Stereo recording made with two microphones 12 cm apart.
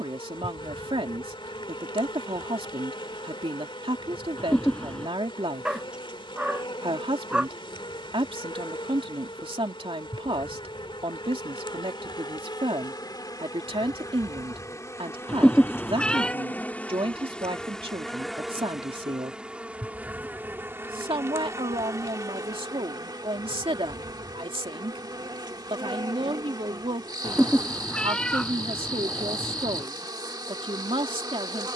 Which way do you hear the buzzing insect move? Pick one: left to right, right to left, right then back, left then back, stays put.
left to right.